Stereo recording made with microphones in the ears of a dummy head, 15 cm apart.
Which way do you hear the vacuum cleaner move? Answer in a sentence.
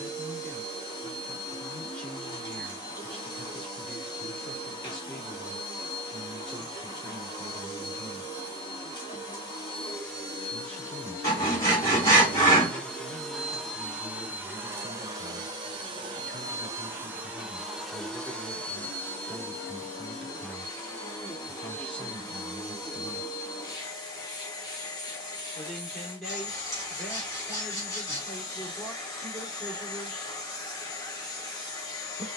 In this clip you hear the vacuum cleaner move from left to right and back again.